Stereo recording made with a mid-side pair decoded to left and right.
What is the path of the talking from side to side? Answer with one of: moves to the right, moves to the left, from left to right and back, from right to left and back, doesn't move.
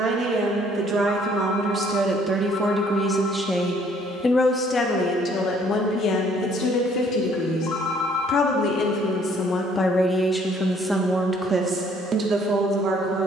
from right to left and back.